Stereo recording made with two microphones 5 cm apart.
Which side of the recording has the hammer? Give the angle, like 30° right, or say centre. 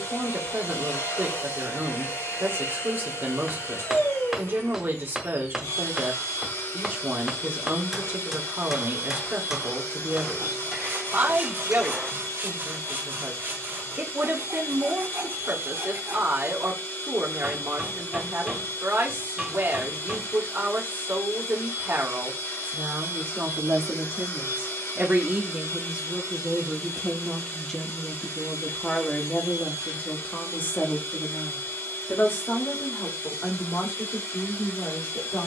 10° right.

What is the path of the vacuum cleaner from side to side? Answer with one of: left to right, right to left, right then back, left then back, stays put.
stays put.